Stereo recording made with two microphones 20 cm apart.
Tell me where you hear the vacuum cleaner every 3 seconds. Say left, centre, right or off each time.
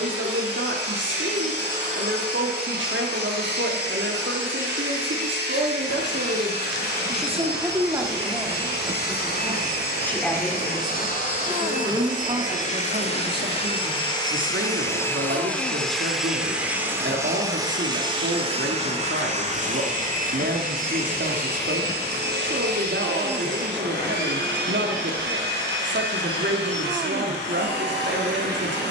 left, left, left, left, left, centre, right, right, right, right.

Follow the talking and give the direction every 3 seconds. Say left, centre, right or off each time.
right, right, right, centre, right, right, right, right, right, right.